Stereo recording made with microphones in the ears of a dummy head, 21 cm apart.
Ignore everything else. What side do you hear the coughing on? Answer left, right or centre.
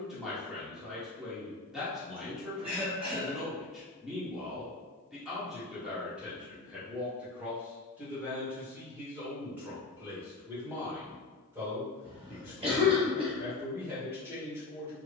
right.